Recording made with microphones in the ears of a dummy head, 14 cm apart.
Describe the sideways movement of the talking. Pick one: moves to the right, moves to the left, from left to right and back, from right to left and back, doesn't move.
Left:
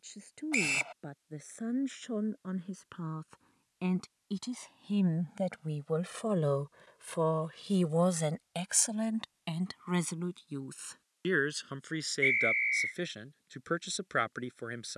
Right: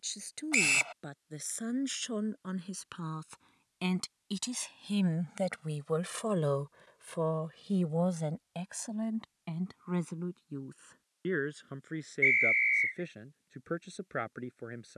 moves to the left.